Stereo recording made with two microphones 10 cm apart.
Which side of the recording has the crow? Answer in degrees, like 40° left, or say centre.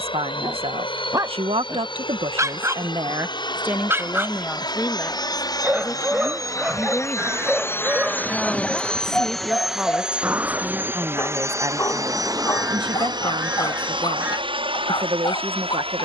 20° right.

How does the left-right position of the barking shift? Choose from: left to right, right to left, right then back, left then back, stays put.
right to left.